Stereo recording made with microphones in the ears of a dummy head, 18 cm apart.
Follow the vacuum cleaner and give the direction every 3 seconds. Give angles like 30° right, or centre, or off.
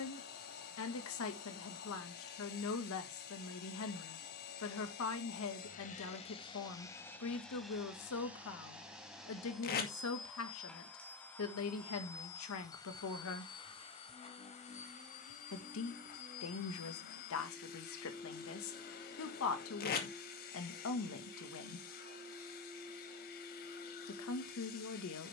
50° left, 50° left, 10° left, centre, 20° left, 50° left, 50° left, 50° left, 50° left.